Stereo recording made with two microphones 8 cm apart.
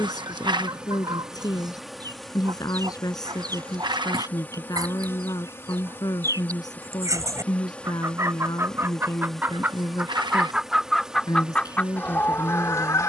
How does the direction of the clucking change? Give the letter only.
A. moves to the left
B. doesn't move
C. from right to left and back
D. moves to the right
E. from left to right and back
A.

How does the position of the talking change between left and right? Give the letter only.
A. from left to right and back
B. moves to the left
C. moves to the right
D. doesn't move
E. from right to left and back
D.